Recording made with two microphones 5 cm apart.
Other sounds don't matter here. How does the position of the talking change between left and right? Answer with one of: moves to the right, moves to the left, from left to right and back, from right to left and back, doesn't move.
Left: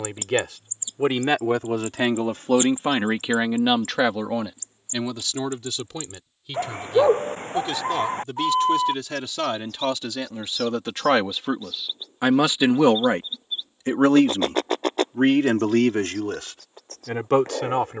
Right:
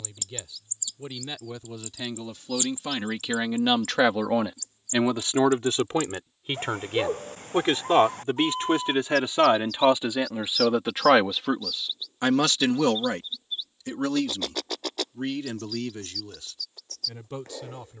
from left to right and back.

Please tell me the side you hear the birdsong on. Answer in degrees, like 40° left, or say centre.
40° left.